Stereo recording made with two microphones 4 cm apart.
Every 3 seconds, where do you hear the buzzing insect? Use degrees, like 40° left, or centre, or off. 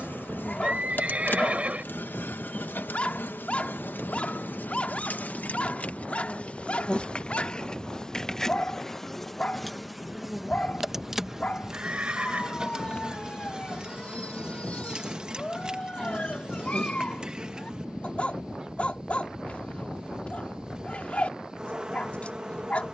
50° left, 50° left, 20° left, centre, 20° right, 20° right, 20° right, 20° right.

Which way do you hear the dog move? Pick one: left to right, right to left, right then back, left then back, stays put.
stays put.